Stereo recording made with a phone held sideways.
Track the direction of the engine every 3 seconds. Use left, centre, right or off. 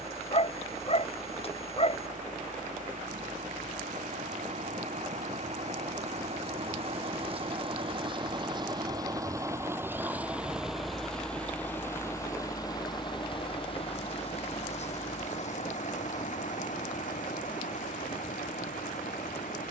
right, right, right, centre, left, left, left.